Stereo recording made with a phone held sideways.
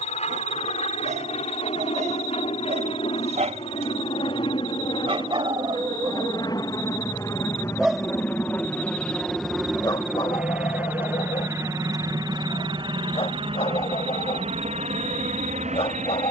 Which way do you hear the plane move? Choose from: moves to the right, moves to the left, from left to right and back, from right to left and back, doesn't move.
moves to the right.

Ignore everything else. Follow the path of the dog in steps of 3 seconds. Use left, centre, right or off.
right, right, centre, left, left, left.